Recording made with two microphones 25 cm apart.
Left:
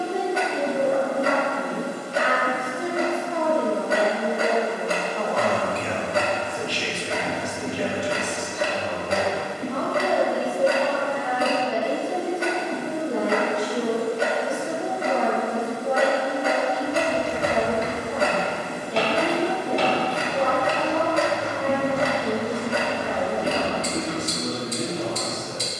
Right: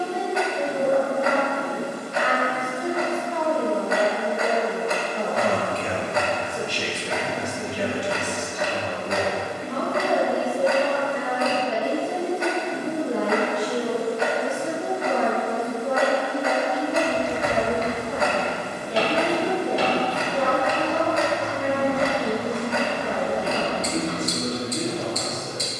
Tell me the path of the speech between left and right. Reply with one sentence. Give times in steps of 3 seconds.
You can hear the speech on the left from 0 s, in the centre from 3 s and on the right from 6 s.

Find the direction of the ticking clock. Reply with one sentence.
You can hear the ticking clock on the left.